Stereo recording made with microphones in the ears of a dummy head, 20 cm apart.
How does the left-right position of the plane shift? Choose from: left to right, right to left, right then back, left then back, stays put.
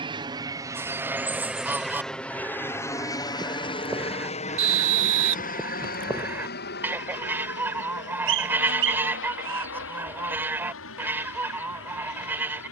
right to left.